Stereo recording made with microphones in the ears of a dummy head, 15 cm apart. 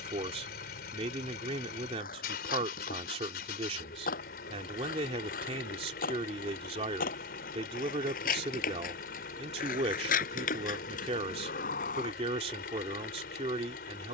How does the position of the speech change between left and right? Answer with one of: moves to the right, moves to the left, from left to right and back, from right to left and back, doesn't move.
doesn't move.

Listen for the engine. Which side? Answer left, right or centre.
left.